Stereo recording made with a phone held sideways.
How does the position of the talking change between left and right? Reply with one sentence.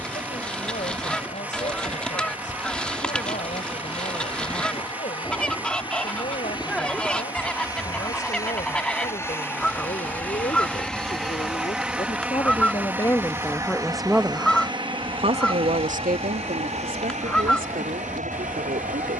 You can hear the talking move to the right.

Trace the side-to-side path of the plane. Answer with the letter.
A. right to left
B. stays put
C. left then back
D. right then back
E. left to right
E.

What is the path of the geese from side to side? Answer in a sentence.
In this clip you hear the geese stay put.